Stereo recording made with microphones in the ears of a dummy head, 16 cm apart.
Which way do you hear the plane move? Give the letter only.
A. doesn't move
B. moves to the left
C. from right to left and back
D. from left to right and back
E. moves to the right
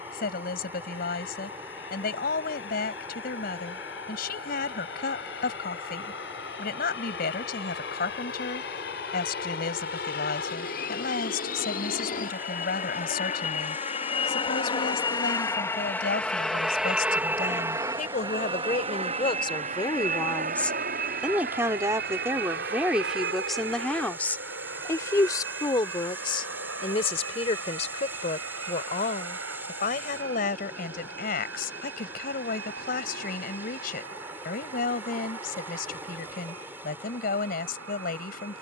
E.